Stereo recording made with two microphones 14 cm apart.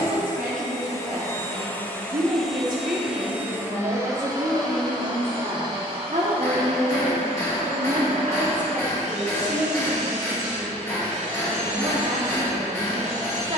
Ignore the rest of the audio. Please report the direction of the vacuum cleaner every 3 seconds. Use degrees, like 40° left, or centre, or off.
20° left, 30° right, 50° right, 60° right, 70° right.